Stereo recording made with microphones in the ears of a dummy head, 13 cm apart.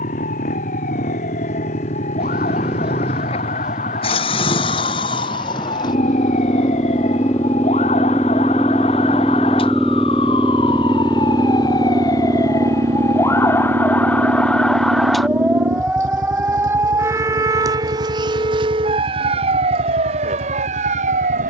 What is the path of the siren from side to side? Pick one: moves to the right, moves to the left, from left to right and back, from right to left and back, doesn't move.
moves to the right.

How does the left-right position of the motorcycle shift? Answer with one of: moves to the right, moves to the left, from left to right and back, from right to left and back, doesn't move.
moves to the right.